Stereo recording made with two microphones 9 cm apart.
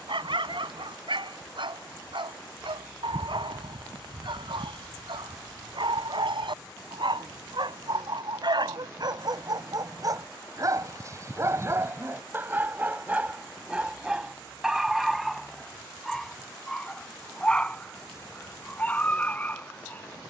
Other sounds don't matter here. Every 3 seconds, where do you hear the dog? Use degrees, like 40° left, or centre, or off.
80° right, 80° right, 70° right, 40° right, 20° right, 10° left, 20° left.